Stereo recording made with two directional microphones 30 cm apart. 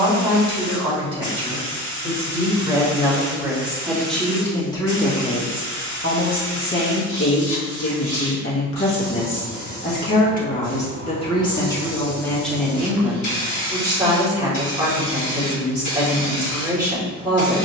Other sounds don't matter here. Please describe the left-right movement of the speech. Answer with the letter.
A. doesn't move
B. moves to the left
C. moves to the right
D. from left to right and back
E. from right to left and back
E.